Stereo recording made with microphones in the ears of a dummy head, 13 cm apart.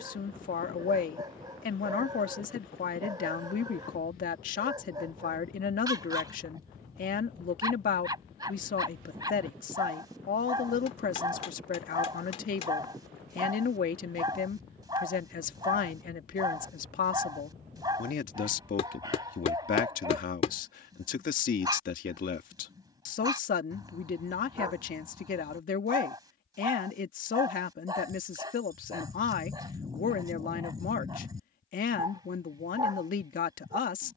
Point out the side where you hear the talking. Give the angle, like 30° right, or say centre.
60° left.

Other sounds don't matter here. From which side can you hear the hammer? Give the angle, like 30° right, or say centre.
40° left.